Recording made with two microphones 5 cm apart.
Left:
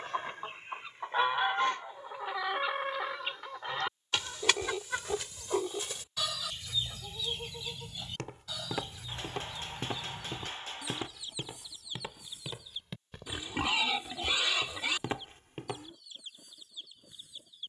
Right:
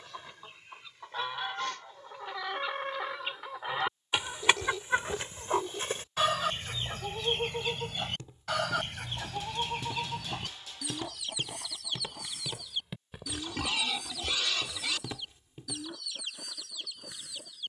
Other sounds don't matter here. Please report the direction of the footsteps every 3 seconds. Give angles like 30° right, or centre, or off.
off, off, 70° left, 30° left, centre, 50° left.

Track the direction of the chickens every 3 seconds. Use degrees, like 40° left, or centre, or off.
20° left, 20° right, 50° right, 60° right, 70° right, 80° right.